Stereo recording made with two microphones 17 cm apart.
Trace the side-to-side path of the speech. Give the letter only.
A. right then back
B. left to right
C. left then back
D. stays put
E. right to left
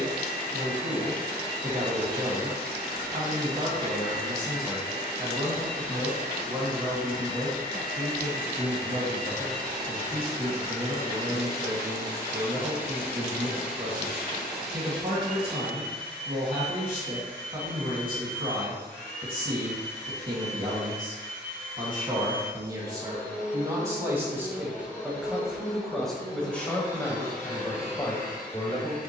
E.